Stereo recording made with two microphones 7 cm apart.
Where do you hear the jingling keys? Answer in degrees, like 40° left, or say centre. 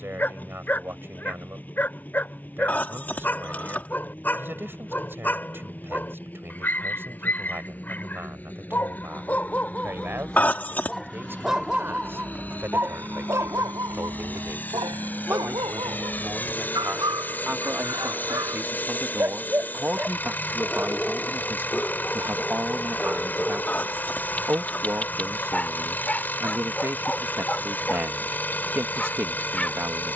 20° left.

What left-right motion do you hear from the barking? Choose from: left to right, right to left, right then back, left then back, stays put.
right then back.